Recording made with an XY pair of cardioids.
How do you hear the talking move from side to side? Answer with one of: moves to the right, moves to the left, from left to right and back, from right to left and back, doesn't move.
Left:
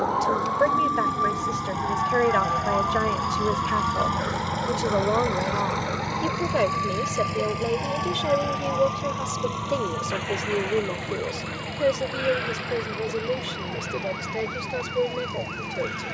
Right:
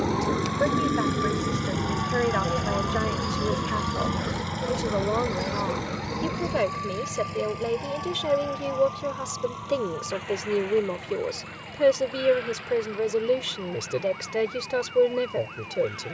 moves to the right.